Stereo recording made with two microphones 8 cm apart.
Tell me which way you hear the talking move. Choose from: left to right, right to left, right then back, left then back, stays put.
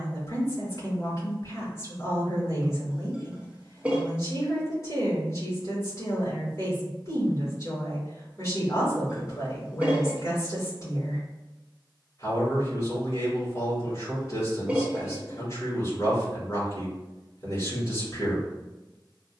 stays put.